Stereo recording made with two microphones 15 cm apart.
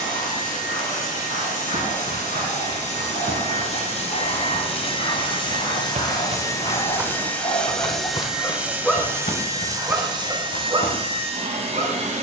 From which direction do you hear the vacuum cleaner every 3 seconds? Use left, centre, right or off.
left, left, centre, right.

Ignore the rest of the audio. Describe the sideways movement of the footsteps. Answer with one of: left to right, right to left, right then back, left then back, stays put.
right to left.